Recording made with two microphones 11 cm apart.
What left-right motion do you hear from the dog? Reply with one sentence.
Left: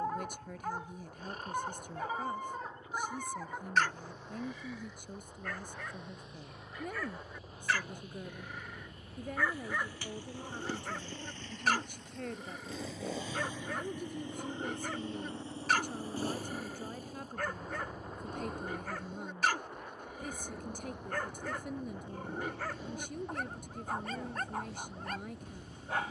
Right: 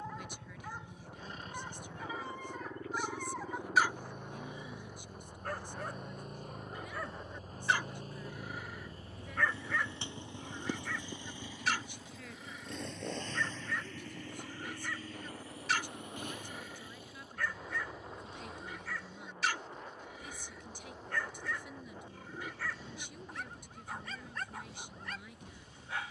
You can hear the dog go right and come back.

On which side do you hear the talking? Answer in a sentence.
In this clip you hear the talking on the left.